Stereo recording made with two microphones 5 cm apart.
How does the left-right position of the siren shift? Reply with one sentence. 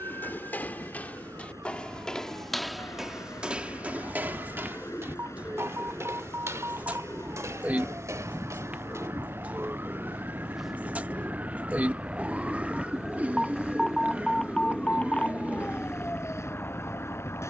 In this clip you hear the siren move from right to left.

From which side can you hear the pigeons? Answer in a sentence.
You can hear the pigeons on the right.